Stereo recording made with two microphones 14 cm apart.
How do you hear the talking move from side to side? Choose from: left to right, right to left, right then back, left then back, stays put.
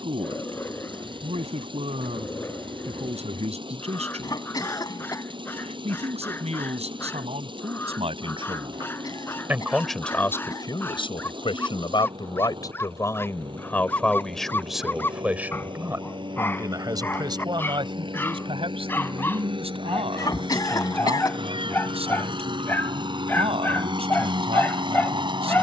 left then back.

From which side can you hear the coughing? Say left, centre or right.
left.